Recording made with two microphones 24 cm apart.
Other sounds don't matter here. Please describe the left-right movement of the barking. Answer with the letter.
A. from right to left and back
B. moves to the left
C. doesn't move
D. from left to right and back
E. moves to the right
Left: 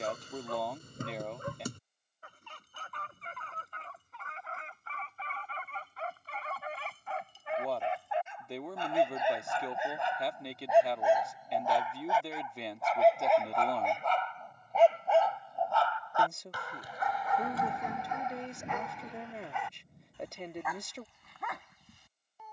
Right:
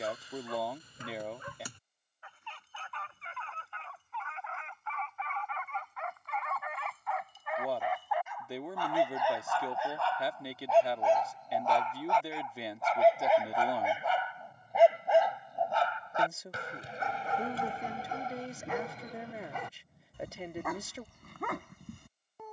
E.